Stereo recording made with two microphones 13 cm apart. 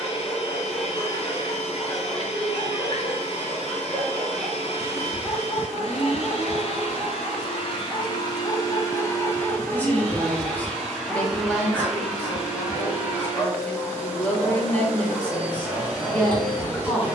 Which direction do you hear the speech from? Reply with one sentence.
You can hear the speech in the centre.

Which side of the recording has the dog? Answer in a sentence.
In this clip you hear the dog in the centre.